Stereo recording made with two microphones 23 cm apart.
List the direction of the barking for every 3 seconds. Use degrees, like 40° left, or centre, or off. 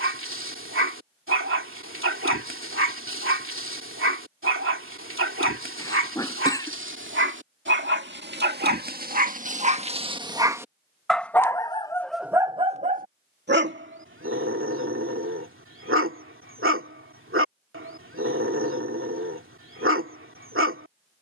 60° right, 60° right, 50° right, 10° right, 40° right, 60° right, 60° right.